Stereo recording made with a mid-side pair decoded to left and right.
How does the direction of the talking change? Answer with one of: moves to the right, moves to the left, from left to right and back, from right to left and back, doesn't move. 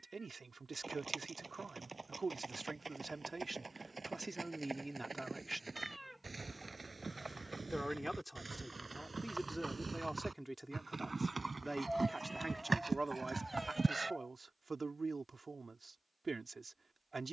from right to left and back.